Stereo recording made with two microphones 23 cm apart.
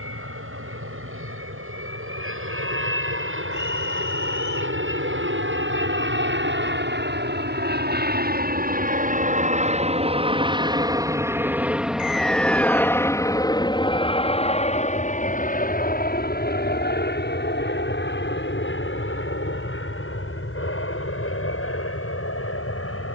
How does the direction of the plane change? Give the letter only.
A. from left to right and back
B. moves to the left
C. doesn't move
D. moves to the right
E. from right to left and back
B.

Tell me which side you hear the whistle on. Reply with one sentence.
In this clip you hear the whistle on the right.